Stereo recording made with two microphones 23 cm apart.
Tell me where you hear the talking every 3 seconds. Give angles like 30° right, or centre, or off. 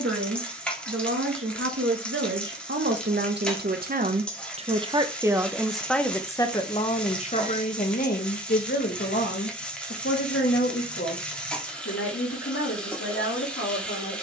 70° right, 30° right, 30° left, 60° left, 60° left.